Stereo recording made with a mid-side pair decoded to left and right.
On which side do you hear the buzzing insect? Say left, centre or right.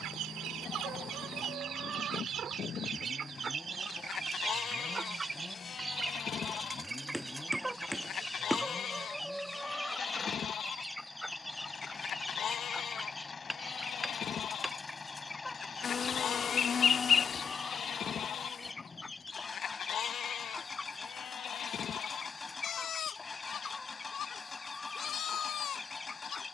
left.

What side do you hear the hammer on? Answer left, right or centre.
centre.